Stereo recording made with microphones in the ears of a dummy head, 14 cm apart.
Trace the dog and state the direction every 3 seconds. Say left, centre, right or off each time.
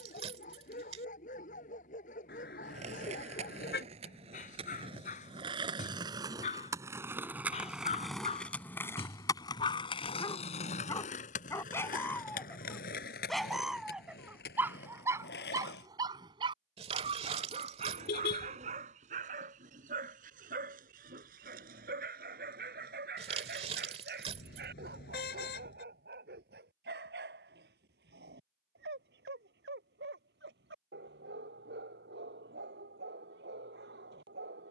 left, left, left, left, centre, right, right, right, right, right, right, right.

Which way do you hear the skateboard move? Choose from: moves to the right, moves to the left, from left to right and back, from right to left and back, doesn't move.
moves to the left.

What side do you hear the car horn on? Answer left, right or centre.
left.